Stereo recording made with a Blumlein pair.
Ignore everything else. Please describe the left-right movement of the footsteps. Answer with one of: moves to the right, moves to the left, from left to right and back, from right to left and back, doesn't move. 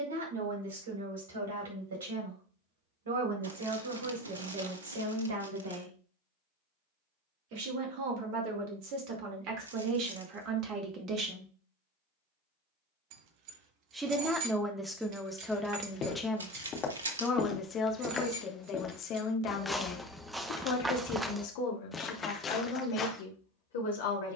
from left to right and back.